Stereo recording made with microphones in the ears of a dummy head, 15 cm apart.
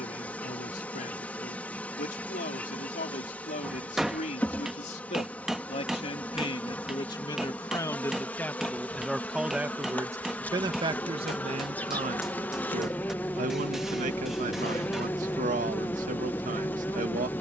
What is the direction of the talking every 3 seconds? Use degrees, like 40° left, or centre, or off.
50° left, 40° left, 20° left, 20° right, 50° right, 50° right.